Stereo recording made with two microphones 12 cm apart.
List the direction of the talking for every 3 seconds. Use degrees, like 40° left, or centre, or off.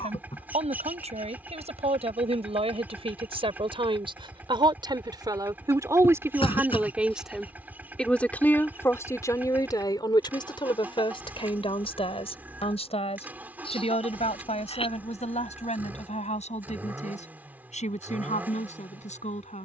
60° right, 40° right, centre, 40° left, 60° left, 70° left, 70° left.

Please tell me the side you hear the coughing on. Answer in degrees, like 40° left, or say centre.
50° left.